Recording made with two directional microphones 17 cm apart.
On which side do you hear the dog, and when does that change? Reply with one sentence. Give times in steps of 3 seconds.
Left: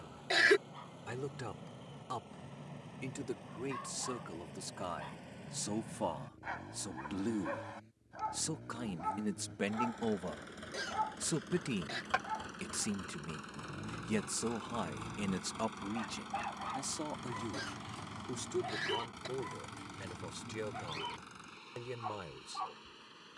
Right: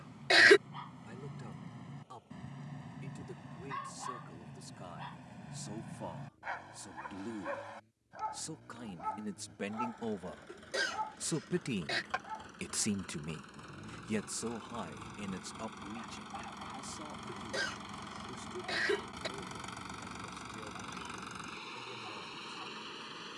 You can hear the dog on the right from 0 s, in the centre from 6 s and on the left from 12 s.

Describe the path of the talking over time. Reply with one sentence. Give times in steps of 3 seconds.
You can hear the talking on the left from 0 s, in the centre from 9 s and on the left from 15 s.